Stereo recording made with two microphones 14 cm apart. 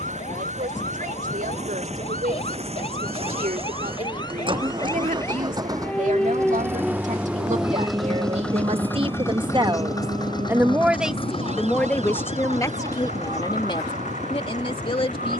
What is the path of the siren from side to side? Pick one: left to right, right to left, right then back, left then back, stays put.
left to right.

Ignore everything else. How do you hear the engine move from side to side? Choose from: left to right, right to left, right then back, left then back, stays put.
right to left.